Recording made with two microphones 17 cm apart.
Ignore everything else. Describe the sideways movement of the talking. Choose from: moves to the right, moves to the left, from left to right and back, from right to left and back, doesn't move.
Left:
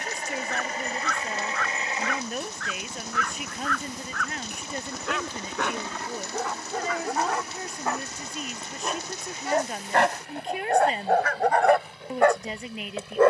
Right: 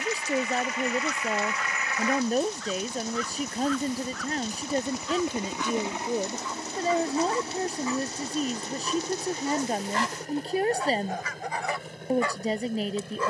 doesn't move.